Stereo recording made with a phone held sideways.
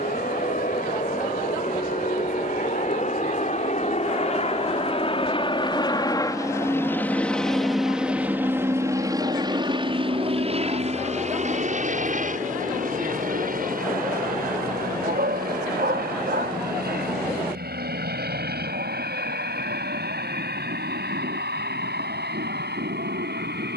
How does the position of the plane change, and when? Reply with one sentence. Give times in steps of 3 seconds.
In this clip you hear the plane on the left from 0 s, in the centre from 6 s and on the right from 9 s.